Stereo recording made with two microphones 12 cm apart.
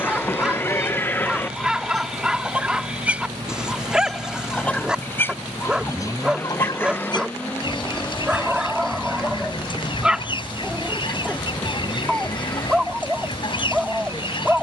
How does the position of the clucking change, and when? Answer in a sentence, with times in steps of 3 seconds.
In this clip you hear the clucking in the centre from 0 s and on the left from 6 s.